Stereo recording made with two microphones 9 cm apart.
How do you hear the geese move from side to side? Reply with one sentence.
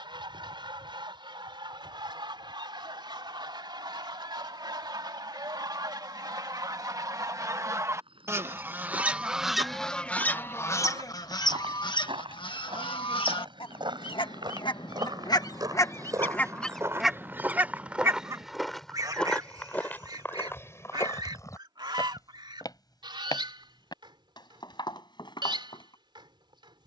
You can hear the geese move from right to left and back again.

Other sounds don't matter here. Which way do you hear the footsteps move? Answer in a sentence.
You can hear the footsteps move to the left.